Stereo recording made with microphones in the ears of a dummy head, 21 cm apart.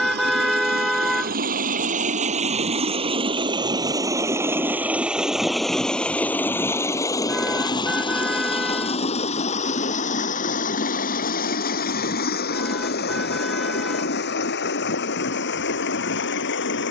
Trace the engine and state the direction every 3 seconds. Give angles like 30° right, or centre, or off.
40° right, 10° right, 20° left, 40° left, 50° left, 50° left.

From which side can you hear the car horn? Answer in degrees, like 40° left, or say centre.
centre.